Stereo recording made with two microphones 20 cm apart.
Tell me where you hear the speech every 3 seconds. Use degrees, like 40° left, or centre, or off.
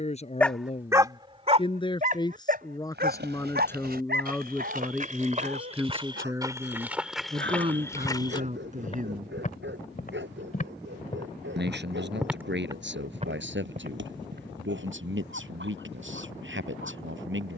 30° left, centre, 30° right, 60° right, 70° right, 80° right.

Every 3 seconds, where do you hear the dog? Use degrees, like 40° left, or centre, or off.
30° right, 60° right, 60° right, 70° right, 70° right, 70° right.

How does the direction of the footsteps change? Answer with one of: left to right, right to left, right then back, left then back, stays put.
left then back.